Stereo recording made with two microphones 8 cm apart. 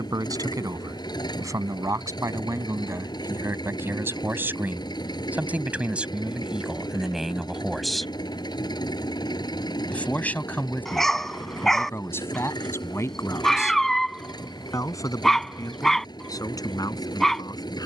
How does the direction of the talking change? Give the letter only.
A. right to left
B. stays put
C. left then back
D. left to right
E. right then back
A.